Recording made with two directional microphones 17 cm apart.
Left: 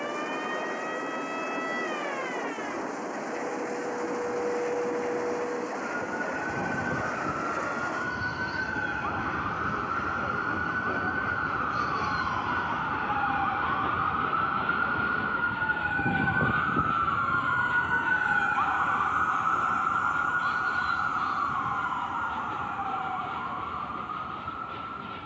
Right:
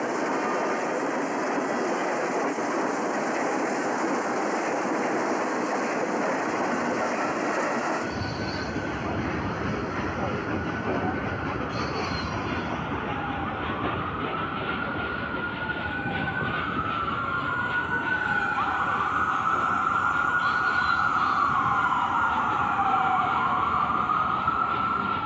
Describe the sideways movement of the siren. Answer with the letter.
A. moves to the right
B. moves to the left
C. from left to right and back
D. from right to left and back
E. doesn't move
A.